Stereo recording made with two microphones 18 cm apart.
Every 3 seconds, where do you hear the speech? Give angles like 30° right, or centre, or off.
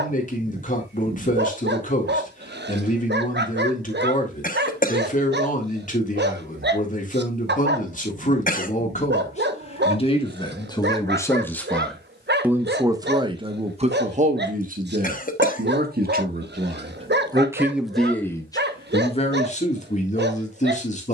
50° left, 50° left, 50° left, 20° left, 30° right, 40° right, 30° left.